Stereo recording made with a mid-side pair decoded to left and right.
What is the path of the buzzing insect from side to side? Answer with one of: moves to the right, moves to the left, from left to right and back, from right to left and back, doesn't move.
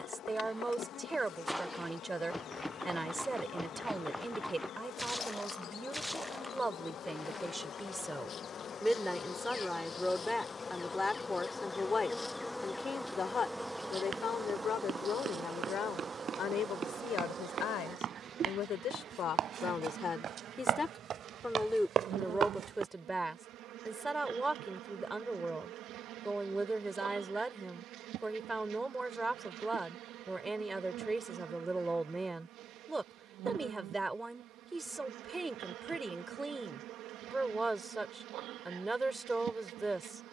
moves to the right.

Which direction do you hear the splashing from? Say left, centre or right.
centre.